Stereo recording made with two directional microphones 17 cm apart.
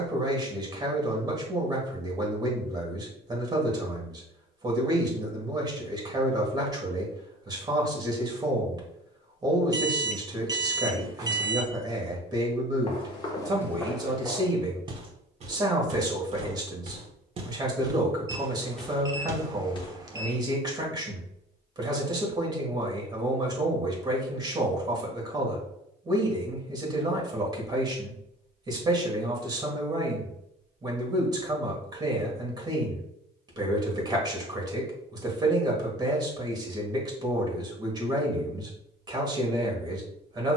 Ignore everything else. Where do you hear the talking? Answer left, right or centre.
right.